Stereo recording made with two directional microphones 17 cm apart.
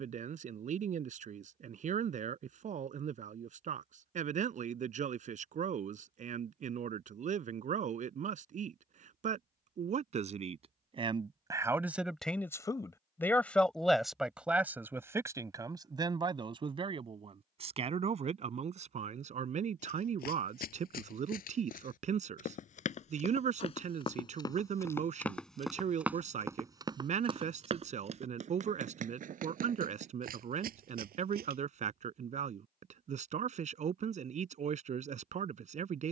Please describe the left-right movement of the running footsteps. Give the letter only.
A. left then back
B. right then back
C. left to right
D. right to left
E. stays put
C.